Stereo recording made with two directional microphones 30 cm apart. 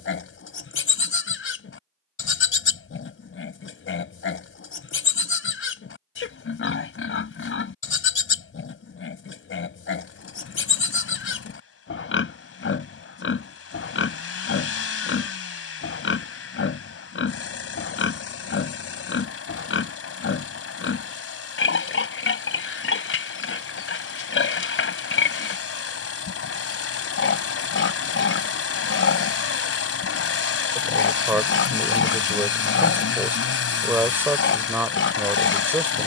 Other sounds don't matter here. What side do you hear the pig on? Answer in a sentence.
You can hear the pig on the left.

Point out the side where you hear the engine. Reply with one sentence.
In this clip you hear the engine on the left.